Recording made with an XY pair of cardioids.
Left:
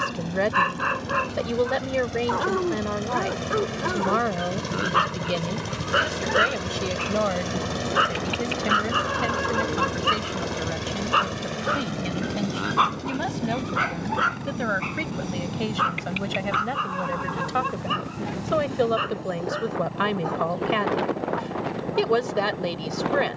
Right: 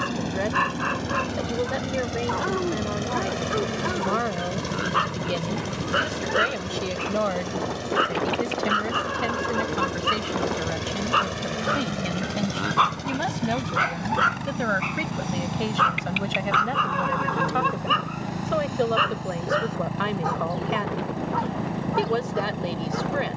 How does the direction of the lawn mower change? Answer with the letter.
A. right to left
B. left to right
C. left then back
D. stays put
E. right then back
C.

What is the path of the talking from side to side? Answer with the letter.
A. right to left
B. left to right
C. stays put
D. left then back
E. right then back
E.